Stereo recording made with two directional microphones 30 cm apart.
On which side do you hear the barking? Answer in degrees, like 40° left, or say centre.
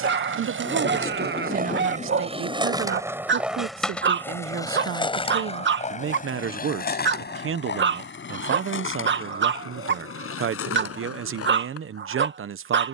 40° right.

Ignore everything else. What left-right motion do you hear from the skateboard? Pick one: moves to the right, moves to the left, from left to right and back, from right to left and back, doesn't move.
moves to the left.